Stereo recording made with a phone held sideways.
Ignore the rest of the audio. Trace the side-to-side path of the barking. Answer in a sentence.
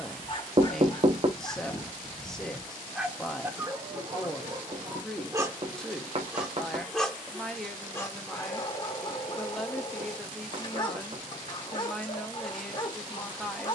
You can hear the barking go right and come back.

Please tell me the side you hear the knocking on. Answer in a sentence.
In this clip you hear the knocking on the right.